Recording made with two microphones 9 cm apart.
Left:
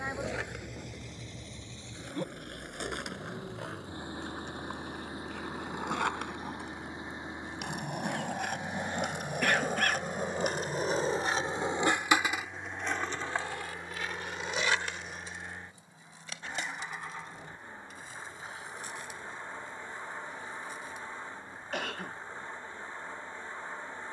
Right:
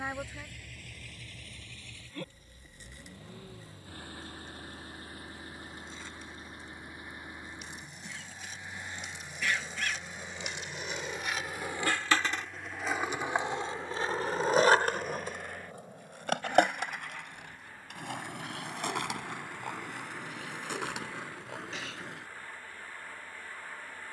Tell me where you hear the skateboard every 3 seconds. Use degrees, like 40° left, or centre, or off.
80° left, 70° left, 70° left, 40° left, 20° right, 60° right, 70° right, 80° right.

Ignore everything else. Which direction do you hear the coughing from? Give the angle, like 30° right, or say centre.
50° left.